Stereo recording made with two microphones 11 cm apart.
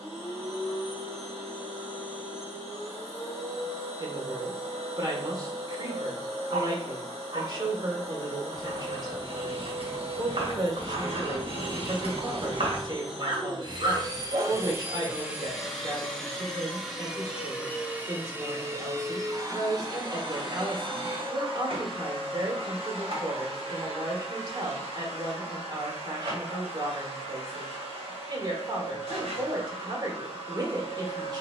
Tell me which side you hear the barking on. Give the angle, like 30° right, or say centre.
60° right.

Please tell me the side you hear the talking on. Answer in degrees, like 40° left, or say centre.
40° right.